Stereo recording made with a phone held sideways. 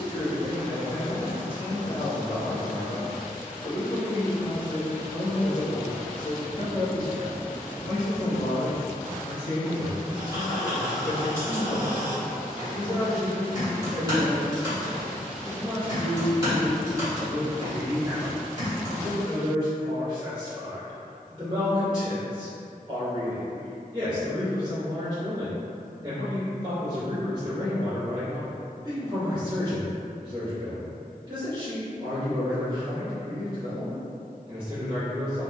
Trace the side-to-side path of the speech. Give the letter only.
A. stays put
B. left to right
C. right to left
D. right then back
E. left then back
B.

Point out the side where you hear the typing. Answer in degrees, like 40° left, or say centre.
30° right.